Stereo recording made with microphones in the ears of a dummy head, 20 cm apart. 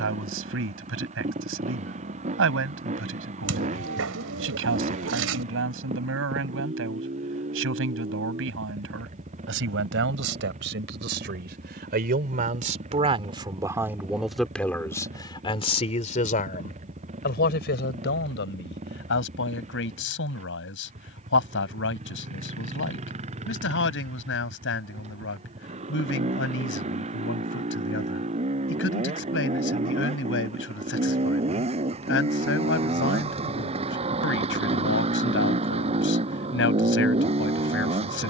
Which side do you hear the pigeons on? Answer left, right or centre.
right.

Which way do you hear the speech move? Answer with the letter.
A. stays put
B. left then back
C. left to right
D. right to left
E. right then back
D.